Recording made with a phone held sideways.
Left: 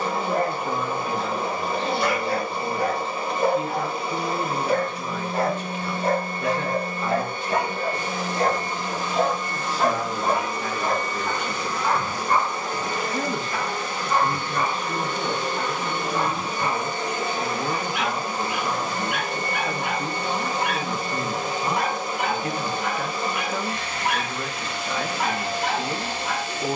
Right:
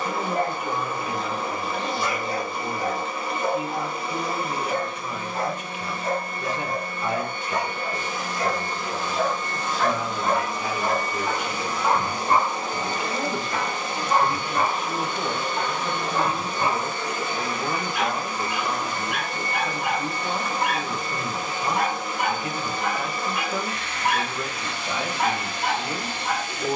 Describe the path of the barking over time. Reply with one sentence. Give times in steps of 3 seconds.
You can hear the barking on the left from 0 s, in the centre from 9 s and on the right from 12 s.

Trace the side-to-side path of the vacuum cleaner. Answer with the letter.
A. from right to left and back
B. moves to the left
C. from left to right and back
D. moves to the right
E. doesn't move
C.